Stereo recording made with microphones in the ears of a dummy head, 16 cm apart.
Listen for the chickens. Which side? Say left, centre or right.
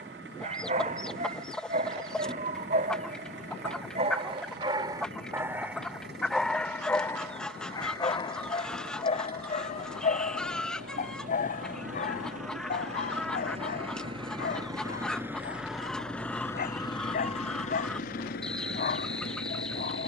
centre.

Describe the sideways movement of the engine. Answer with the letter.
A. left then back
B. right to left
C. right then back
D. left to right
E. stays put
B.